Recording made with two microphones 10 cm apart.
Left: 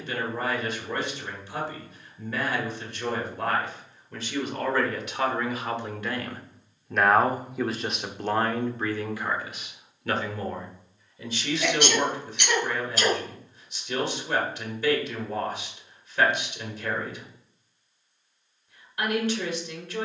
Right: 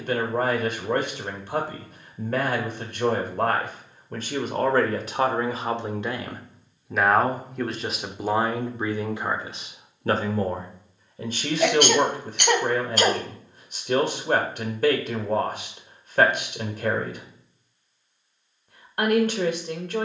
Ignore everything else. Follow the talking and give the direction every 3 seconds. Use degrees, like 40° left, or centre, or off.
50° right, 40° right, 10° right, 40° right, 50° right, 50° right, 50° right.